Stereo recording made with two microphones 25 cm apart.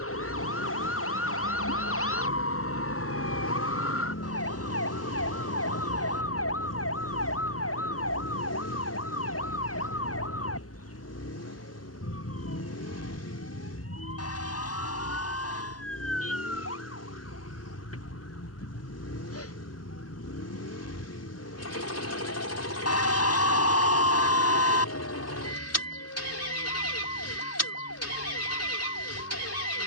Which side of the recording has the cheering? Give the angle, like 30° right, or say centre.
70° left.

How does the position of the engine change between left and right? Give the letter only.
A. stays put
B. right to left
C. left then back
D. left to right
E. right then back
A.